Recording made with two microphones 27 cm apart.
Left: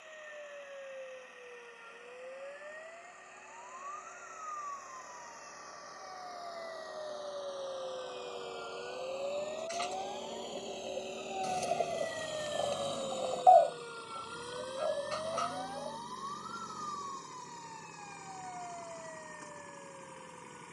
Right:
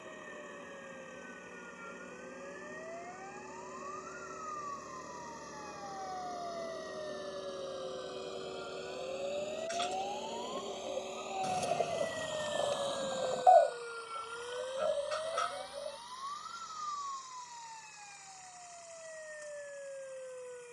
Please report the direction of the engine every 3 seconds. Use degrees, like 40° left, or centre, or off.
60° right, 50° right, 30° right, centre, 30° left, 60° left, 70° left.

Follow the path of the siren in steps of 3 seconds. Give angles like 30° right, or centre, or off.
50° left, 40° left, 30° left, 10° left, 10° right, 40° right, 50° right.